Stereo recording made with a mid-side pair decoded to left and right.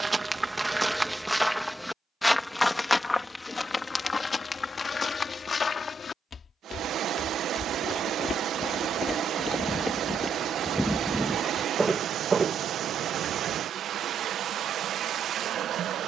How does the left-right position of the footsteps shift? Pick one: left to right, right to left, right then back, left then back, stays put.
left then back.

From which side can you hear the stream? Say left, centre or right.
right.